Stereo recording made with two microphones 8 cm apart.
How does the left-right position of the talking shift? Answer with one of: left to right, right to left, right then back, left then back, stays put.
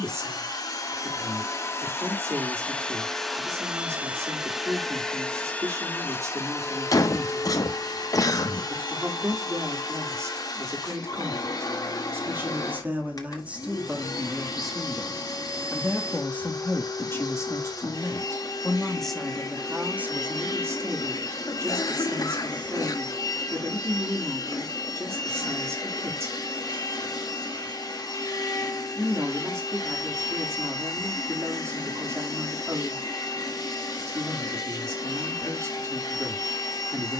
left then back.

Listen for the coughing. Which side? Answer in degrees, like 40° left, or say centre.
50° left.